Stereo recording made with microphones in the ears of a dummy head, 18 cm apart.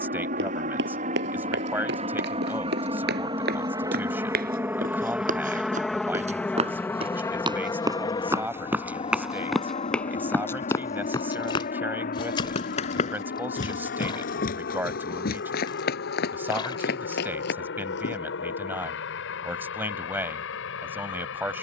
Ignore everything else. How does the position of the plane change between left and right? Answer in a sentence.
You can hear the plane travel towards the left.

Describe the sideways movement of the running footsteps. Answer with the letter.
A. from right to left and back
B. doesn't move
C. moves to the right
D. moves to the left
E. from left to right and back
D.